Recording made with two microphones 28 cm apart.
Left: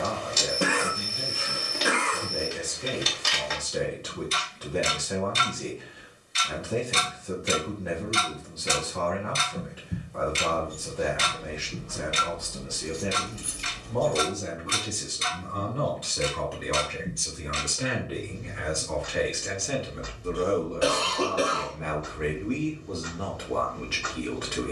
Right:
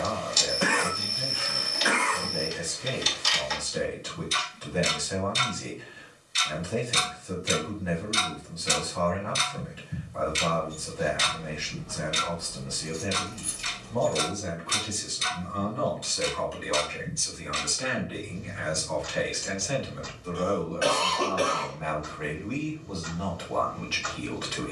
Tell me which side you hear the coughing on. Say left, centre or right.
left.